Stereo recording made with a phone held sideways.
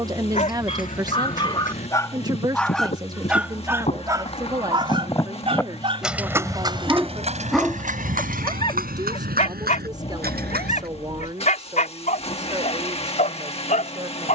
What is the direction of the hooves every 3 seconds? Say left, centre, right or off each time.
left, left, right, right, off.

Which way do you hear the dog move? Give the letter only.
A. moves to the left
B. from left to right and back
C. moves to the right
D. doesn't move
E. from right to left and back
B.